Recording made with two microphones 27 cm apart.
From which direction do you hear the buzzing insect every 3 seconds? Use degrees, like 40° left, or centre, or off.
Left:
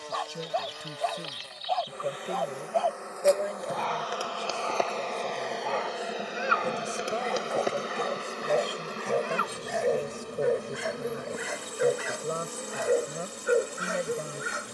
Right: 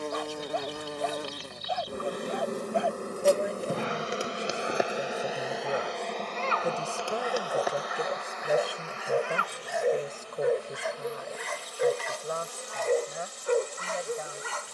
50° right, 20° right, 20° left, 50° left, 60° left.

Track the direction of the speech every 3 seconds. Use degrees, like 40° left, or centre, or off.
40° left, 20° right, 10° right, 10° left, 40° left.